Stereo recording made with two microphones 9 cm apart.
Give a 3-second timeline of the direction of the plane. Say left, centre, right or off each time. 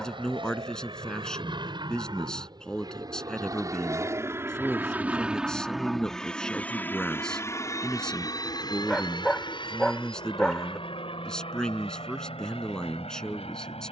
right, right, left, left, left.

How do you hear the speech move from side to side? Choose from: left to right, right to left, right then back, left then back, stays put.
stays put.